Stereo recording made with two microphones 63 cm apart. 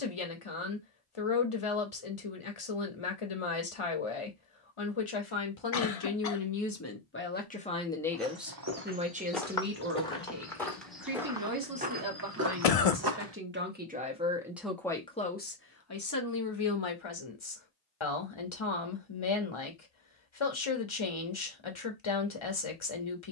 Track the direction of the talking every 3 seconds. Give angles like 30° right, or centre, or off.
50° left, 50° left, 20° left, 20° right, 20° right, 30° left, 50° left, 50° left.